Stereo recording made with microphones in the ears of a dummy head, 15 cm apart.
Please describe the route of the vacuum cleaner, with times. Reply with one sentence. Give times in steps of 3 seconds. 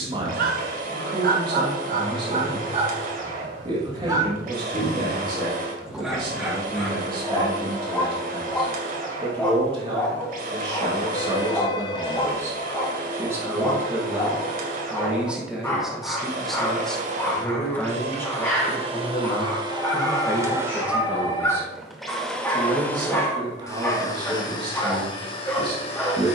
In this clip you hear the vacuum cleaner on the right from 0 s, in the centre from 21 s and on the left from 24 s.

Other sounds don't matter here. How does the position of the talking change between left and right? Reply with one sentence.
In this clip you hear the talking move from right to left and back again.